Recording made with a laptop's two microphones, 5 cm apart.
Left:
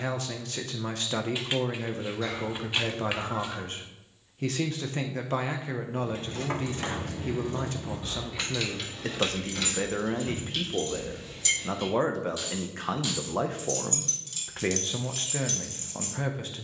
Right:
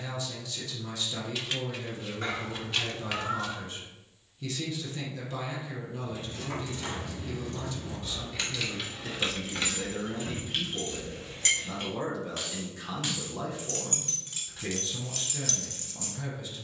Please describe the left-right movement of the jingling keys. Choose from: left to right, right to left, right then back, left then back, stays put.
right then back.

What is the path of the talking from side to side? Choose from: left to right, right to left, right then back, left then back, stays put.
stays put.